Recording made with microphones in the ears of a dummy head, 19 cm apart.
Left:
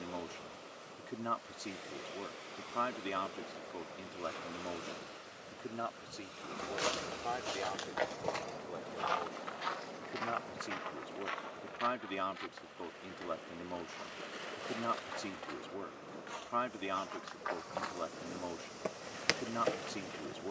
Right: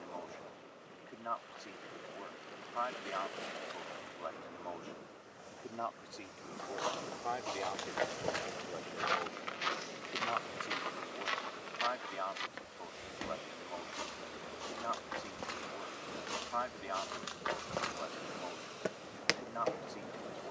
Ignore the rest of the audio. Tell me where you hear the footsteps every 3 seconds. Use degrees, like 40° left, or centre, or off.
off, off, 10° left, 40° right, 60° right, 50° right, centre.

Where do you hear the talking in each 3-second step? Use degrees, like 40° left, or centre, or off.
50° left, 40° left, centre, 20° left, 40° left, 40° left, 40° left.